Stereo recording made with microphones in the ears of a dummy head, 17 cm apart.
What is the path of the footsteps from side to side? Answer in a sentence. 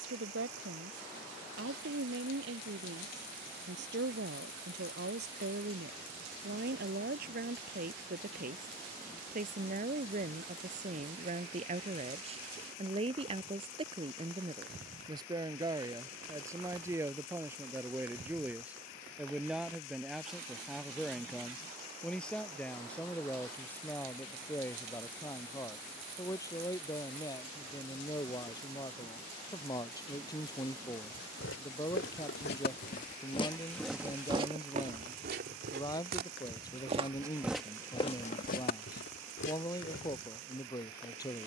In this clip you hear the footsteps move from left to right and back again.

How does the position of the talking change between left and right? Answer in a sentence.
You can hear the talking move to the left.